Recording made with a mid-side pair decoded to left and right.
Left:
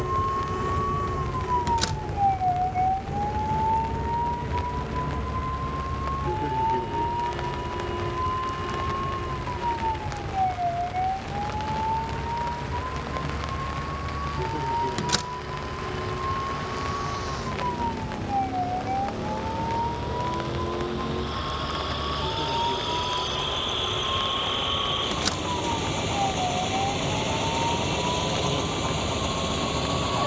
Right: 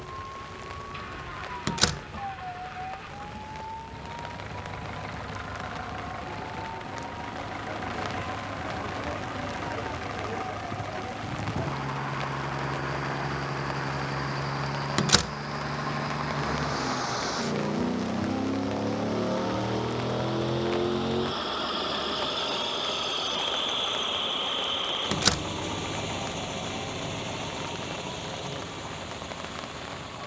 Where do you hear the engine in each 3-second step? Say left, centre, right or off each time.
right, right, right, right, right, right, right, centre, centre, left.